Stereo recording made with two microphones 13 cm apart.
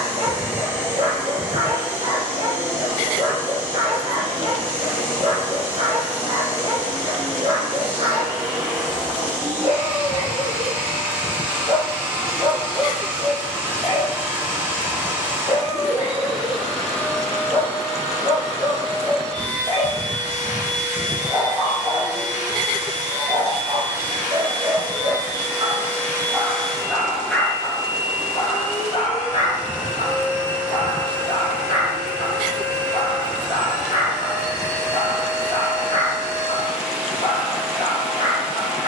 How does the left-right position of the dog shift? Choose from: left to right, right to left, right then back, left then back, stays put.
right to left.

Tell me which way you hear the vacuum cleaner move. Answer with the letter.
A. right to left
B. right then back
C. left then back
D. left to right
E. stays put
C.